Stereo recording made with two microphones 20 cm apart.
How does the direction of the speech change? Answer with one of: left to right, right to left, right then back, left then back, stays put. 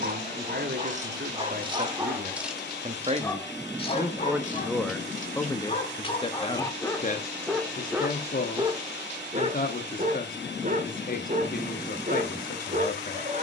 right to left.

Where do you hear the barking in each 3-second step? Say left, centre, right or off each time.
right, left, centre, right, right.